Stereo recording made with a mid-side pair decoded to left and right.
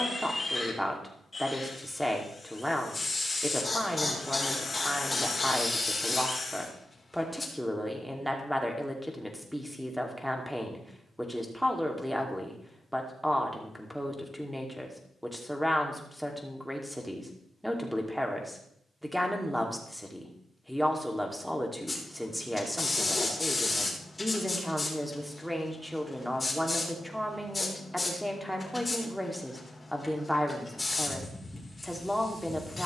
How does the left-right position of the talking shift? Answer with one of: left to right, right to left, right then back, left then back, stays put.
stays put.